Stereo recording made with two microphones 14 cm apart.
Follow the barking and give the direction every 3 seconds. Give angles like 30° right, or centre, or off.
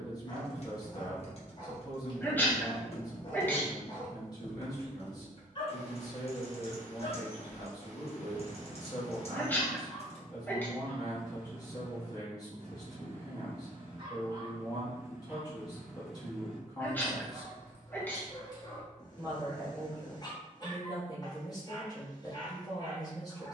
30° left, 30° left, 30° left, 10° left, 40° right, centre, 30° left, 30° left.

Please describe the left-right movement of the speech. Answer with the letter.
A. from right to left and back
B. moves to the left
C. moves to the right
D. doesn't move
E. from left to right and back
D.